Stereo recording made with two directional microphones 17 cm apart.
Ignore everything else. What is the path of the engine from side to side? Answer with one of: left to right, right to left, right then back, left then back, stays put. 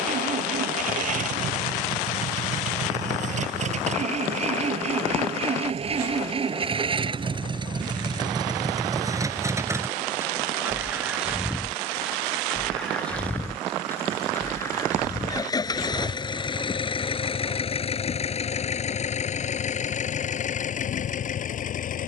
right to left.